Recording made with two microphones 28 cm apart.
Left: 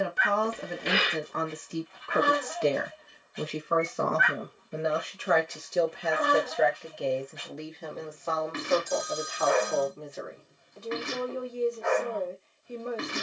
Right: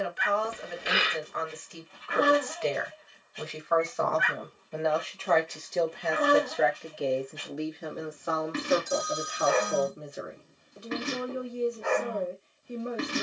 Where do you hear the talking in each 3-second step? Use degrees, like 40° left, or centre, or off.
50° left, 20° left, 10° right, 20° right, 20° right.